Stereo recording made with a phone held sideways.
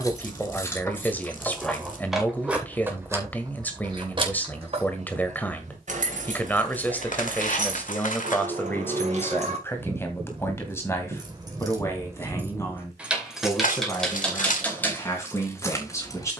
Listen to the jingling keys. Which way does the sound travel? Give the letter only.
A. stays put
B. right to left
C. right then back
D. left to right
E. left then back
C.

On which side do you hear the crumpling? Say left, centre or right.
left.